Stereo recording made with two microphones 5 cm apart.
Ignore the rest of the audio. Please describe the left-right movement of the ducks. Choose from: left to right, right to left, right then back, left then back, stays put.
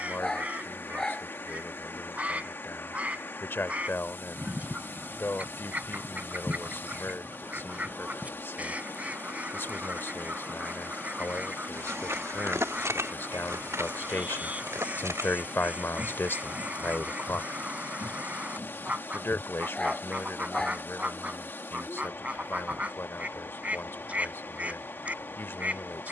stays put.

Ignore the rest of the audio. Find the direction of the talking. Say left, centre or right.
left.